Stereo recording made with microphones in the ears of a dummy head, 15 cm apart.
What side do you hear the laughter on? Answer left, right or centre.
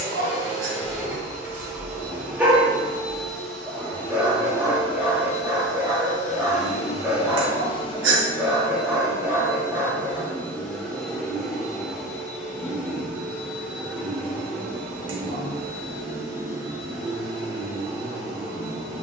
right.